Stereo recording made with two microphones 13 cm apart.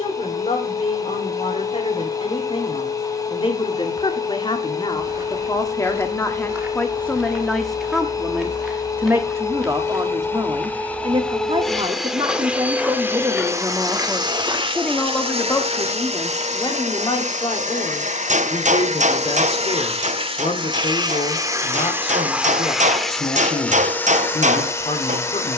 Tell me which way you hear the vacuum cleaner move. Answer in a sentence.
In this clip you hear the vacuum cleaner go right and come back.